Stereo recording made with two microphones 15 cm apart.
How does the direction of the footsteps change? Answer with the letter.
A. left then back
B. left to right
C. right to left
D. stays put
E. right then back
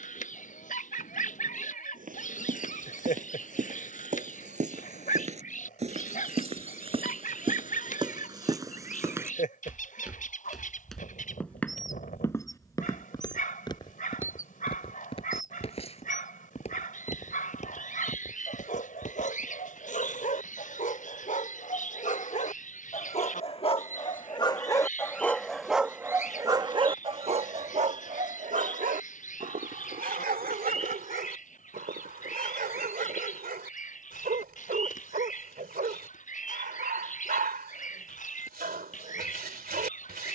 C.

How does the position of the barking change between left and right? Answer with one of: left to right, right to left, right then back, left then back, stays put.
left to right.